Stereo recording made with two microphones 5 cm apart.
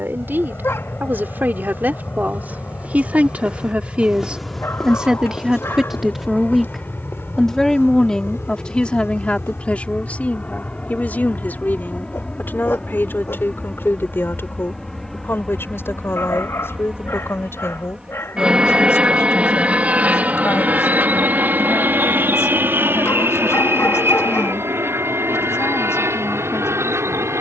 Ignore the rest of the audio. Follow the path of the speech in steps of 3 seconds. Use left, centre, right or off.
right, right, centre, left, left, left, left, left, left.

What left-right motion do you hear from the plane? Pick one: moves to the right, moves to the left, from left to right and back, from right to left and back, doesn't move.
moves to the right.